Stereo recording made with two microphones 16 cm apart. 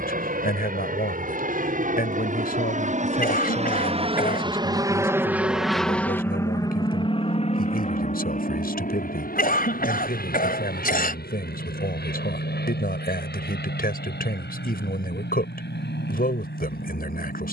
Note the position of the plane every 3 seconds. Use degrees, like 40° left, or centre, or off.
70° right, 30° right, 40° left, 60° left, 70° left, 70° left.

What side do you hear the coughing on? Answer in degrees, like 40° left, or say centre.
60° left.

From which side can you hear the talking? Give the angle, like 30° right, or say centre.
70° left.